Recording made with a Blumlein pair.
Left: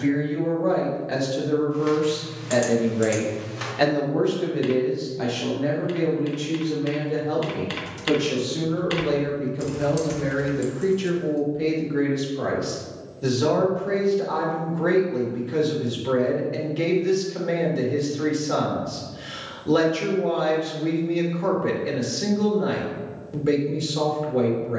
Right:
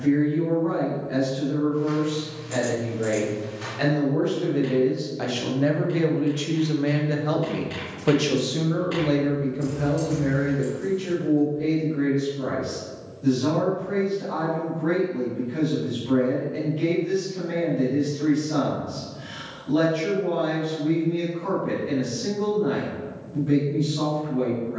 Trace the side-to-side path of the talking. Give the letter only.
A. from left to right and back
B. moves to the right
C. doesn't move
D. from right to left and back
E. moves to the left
A.